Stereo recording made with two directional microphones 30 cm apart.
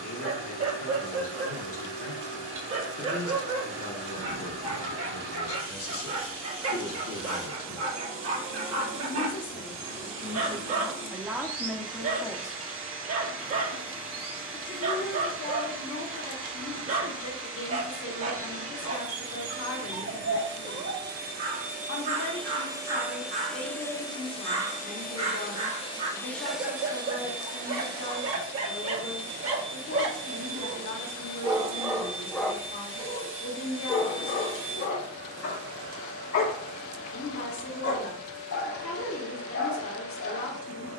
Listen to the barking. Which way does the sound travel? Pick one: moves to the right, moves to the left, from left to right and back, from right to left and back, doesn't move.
moves to the left.